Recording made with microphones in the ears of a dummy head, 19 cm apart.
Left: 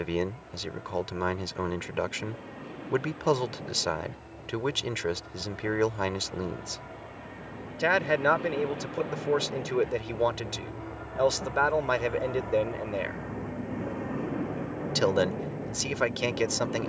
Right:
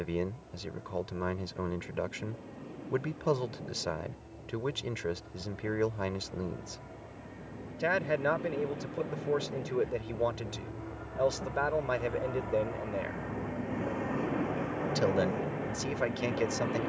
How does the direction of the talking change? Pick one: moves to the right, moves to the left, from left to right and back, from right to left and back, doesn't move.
doesn't move.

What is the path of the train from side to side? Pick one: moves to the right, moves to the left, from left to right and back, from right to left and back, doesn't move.
moves to the right.